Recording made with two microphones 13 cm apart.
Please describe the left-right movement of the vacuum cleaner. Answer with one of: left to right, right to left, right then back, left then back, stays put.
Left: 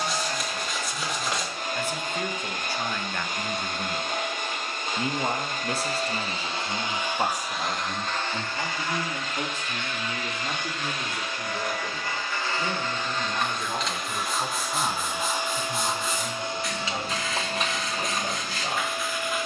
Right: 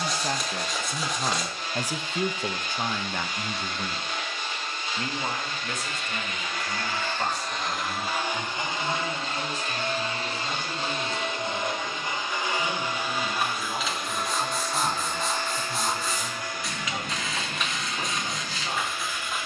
right then back.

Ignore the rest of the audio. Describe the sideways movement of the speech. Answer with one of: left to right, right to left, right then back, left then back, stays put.
right to left.